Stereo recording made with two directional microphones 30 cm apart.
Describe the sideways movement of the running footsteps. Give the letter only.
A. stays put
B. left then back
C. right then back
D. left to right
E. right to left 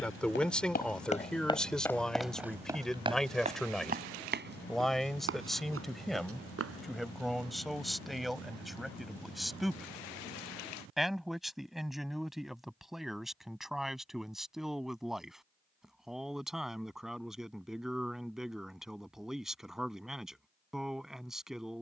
D.